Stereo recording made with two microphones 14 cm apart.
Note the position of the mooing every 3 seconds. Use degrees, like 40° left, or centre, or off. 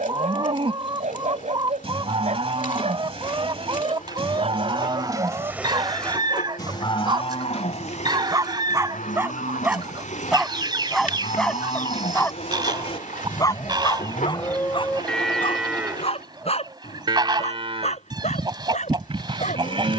40° right, 30° right, 50° left, 60° left, 30° left, 20° right, 40° right.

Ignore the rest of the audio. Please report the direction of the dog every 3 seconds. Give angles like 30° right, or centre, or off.
60° right, 50° right, 30° right, centre, 30° left, 50° left, 60° left.